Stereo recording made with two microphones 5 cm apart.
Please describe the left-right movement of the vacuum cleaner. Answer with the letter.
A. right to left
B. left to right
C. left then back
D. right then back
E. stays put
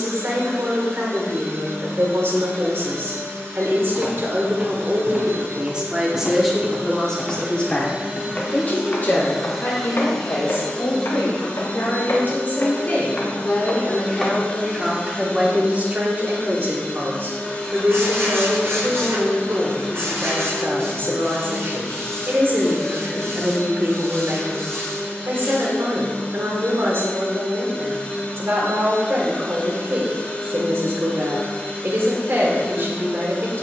A.